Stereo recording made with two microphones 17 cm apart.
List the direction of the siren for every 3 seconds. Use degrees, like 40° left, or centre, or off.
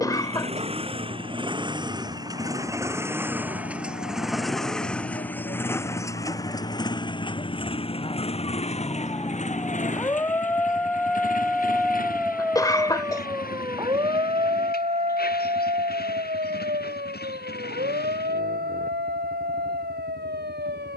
60° left, 50° left, 40° left, 10° left, 20° right, 50° right, 70° right.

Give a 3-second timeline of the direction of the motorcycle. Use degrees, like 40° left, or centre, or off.
30° right, centre, 30° left, 50° left, 60° left, 70° left, 70° left.